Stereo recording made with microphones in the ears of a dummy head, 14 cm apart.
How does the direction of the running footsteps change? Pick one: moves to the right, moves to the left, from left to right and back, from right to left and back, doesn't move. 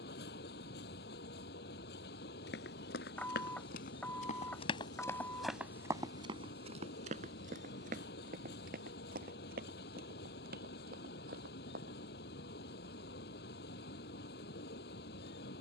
moves to the right.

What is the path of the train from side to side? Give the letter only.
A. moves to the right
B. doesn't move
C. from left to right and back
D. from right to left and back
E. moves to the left
B.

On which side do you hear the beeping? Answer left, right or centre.
centre.